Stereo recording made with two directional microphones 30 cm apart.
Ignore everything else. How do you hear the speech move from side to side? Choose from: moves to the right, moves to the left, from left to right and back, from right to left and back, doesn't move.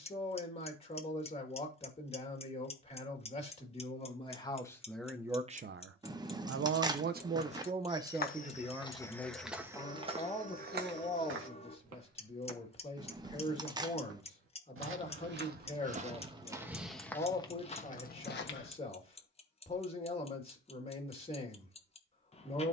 from left to right and back.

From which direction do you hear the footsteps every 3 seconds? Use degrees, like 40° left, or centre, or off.
off, off, 30° left, 20° right, 50° right, 10° right, 40° left, off.